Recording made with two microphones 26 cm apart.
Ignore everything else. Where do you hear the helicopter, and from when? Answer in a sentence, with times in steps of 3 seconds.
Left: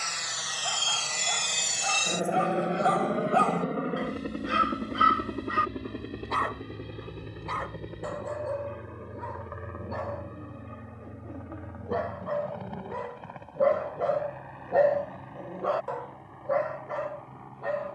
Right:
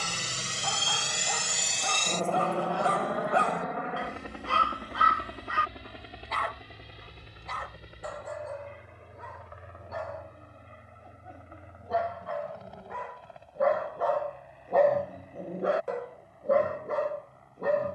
In this clip you hear the helicopter in the centre from 0 s and on the left from 3 s.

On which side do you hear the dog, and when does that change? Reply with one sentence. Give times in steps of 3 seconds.
You can hear the dog on the right from 0 s, in the centre from 3 s, on the left from 6 s and on the right from 15 s.